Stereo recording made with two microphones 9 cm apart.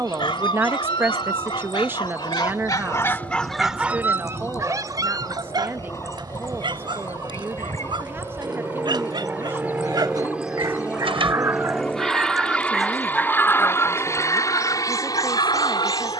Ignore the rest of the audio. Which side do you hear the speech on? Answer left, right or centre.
right.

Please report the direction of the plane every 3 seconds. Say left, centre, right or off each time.
right, right, right, centre, left, left.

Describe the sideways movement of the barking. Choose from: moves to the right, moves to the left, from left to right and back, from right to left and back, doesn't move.
from left to right and back.